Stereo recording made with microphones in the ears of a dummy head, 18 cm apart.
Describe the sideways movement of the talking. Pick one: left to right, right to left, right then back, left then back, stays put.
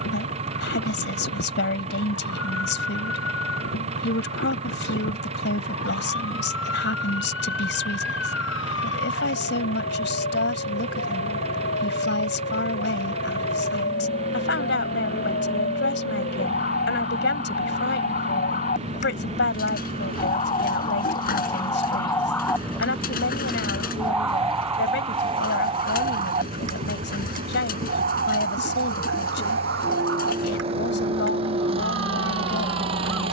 stays put.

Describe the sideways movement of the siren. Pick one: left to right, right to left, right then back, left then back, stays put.
left to right.